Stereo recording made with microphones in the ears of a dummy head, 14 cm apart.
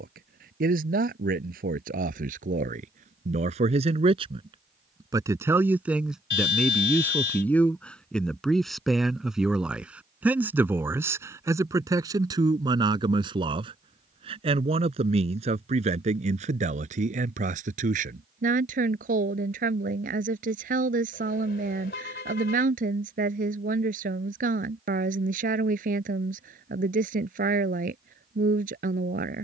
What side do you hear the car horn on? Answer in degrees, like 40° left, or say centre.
60° left.